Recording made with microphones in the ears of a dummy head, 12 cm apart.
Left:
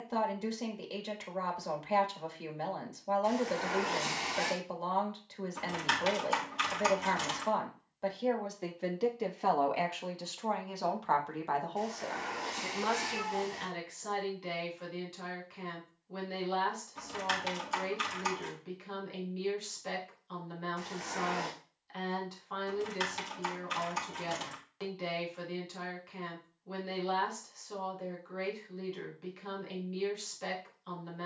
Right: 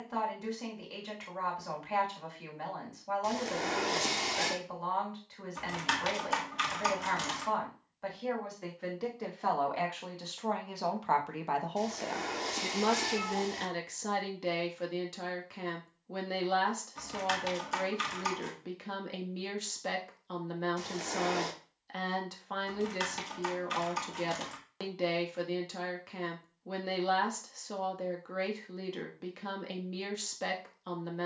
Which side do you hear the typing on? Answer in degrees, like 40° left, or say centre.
centre.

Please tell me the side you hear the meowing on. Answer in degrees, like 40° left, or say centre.
40° right.